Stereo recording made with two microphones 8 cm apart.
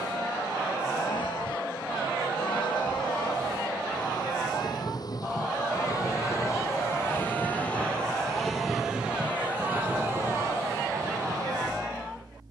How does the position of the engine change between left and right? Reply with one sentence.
In this clip you hear the engine go from the left side to the right.